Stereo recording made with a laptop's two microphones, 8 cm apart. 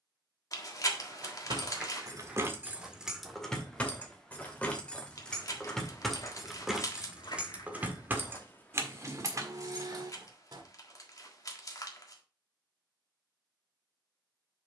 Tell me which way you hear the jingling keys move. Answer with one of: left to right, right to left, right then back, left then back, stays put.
left then back.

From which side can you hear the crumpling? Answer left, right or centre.
left.